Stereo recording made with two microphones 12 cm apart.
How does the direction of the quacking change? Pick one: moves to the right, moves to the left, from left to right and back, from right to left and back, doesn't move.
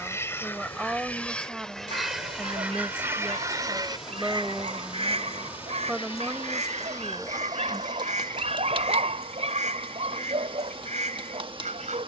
moves to the right.